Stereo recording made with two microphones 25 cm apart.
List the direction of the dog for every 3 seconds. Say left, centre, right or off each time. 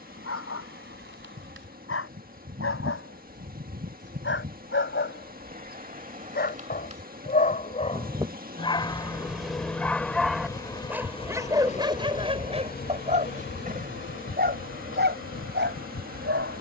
left, left, left, centre, right, right.